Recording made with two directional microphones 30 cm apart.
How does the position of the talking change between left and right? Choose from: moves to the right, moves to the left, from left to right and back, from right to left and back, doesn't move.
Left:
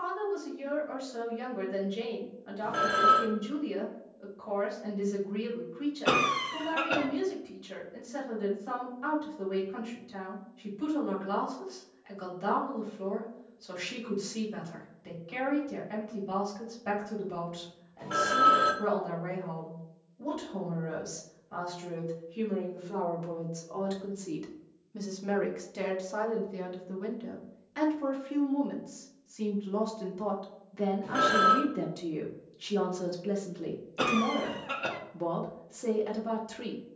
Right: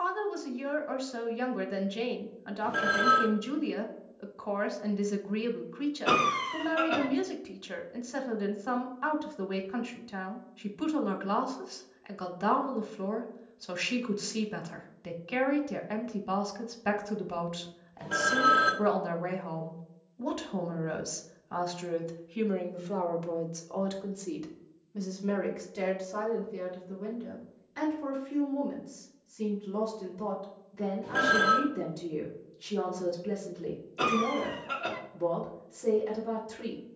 moves to the left.